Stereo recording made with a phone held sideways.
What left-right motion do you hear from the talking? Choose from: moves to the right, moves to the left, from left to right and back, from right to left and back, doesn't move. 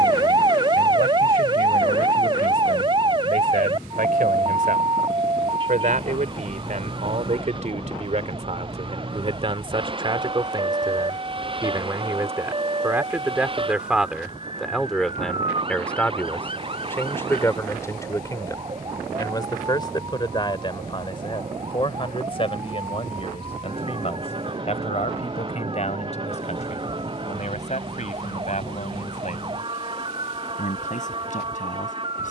moves to the left.